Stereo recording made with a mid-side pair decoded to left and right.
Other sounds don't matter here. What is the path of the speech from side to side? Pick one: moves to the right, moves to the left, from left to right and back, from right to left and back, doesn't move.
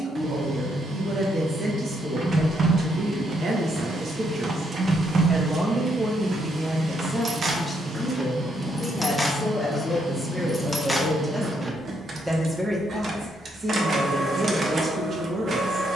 from right to left and back.